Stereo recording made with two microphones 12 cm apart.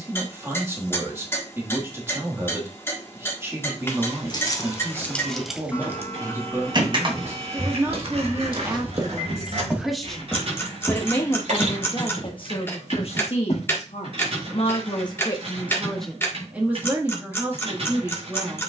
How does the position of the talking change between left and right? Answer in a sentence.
You can hear the talking go left and come back.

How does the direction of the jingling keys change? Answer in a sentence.
You can hear the jingling keys go from the left side to the right.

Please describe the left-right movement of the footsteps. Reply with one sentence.
You can hear the footsteps move from right to left.